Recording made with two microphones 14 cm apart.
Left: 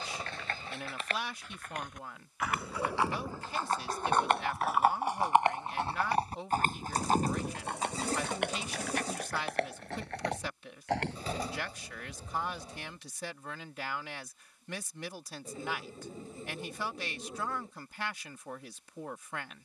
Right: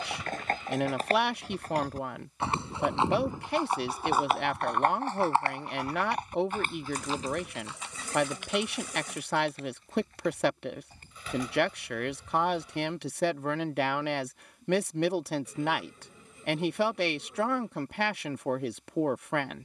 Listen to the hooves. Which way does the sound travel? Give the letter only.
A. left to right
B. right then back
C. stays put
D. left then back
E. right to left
E.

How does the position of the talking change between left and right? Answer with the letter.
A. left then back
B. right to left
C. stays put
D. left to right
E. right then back
C.